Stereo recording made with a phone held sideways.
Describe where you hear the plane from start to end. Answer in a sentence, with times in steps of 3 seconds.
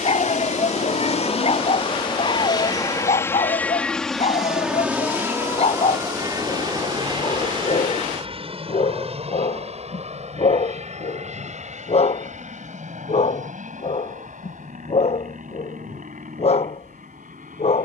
In this clip you hear the plane on the left from 0 s, in the centre from 3 s and on the right from 6 s.